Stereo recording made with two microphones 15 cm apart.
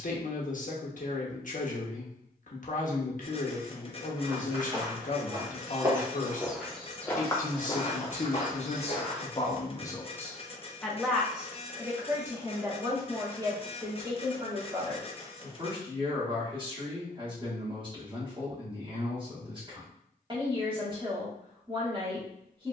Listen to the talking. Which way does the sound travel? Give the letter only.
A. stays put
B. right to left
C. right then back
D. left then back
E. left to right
E.